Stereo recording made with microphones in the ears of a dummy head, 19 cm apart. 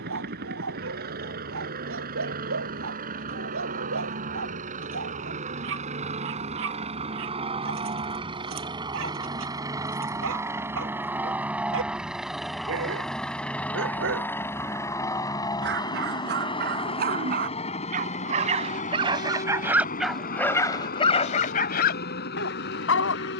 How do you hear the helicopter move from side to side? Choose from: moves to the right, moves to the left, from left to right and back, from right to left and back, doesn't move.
moves to the left.